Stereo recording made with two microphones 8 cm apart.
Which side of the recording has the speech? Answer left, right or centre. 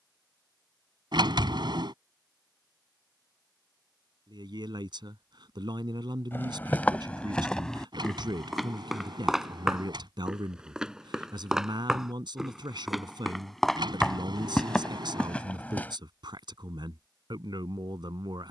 right.